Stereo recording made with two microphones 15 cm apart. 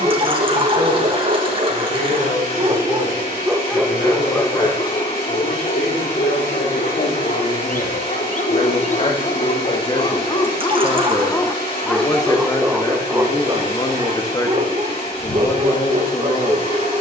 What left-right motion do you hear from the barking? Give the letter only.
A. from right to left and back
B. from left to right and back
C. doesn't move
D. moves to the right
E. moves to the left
A.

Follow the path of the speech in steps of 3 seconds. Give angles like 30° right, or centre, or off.
60° left, 60° left, 50° left, 30° left, 20° left, 20° left.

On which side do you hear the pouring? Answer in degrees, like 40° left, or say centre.
30° right.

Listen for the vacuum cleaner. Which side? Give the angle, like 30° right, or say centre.
40° left.